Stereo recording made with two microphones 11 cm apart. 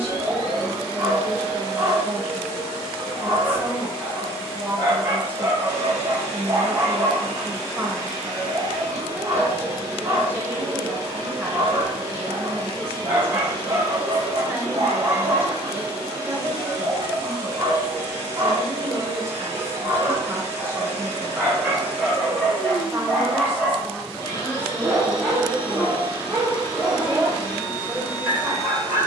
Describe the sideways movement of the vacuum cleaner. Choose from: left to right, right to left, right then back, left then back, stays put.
stays put.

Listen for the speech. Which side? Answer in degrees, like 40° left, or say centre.
20° right.